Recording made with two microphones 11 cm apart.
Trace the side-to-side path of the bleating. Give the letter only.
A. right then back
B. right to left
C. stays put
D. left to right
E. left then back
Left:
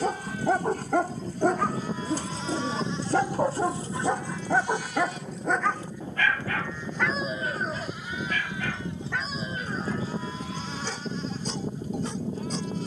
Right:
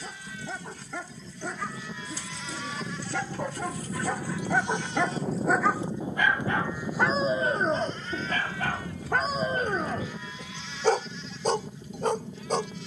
A.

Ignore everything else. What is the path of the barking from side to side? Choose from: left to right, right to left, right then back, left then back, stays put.
left to right.